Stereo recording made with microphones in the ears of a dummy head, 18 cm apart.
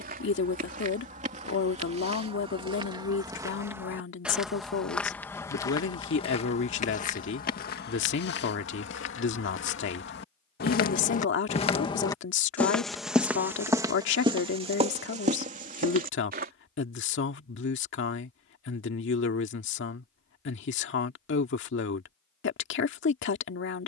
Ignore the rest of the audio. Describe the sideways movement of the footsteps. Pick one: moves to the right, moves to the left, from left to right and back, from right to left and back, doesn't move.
from right to left and back.